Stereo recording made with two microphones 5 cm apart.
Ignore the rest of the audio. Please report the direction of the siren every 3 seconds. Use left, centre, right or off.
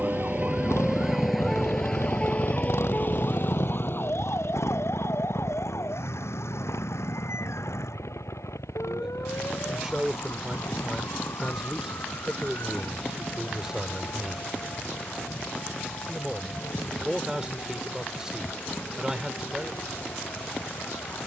centre, left, left, left, left, left, left.